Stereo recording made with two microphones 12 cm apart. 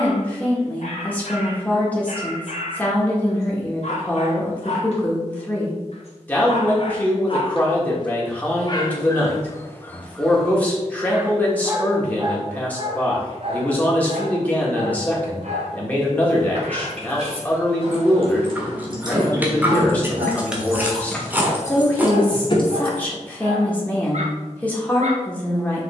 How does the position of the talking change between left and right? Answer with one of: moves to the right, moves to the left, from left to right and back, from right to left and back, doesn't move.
doesn't move.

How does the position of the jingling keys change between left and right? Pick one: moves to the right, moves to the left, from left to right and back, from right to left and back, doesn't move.
moves to the left.